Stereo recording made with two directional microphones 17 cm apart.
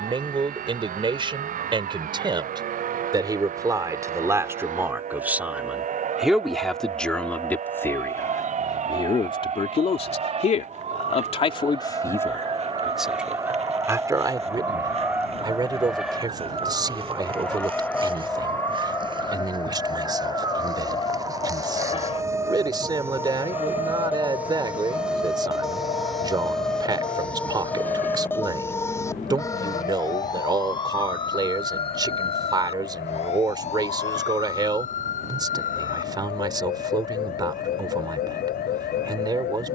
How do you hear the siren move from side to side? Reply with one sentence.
In this clip you hear the siren move from right to left.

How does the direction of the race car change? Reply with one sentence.
In this clip you hear the race car move from right to left.